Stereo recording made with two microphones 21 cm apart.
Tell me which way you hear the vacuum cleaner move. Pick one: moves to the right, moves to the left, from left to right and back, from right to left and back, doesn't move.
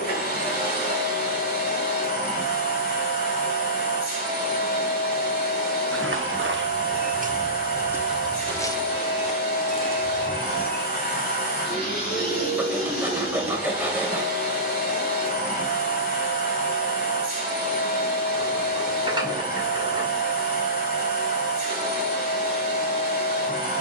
doesn't move.